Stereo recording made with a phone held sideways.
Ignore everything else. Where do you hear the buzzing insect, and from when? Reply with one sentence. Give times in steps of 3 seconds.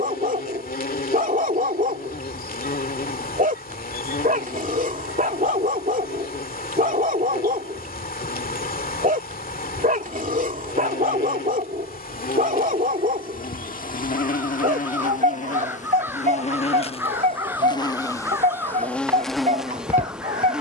You can hear the buzzing insect on the left from 0 s and in the centre from 18 s.